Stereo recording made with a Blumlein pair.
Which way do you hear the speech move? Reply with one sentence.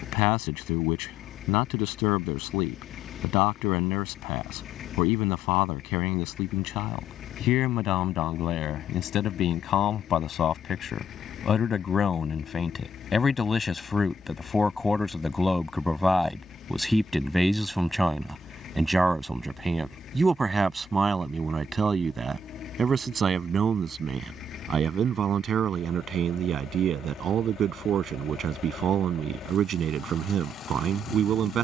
You can hear the speech move from left to right.